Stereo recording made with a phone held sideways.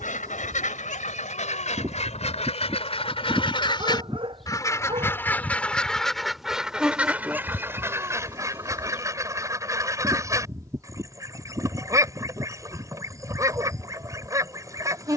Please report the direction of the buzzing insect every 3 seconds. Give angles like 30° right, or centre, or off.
20° right, centre, 10° right, 20° right, 30° right.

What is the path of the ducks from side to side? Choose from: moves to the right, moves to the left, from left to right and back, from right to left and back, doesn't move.
moves to the right.